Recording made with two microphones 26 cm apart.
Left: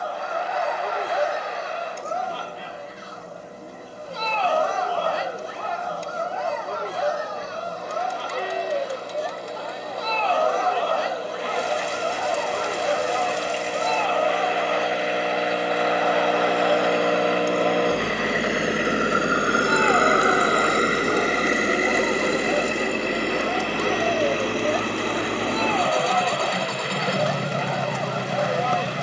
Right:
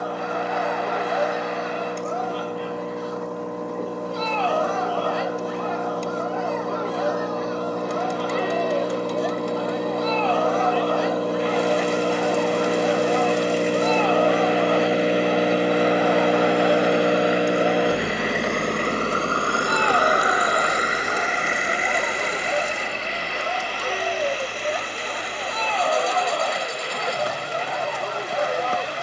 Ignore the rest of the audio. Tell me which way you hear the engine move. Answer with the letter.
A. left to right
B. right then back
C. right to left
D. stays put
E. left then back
C.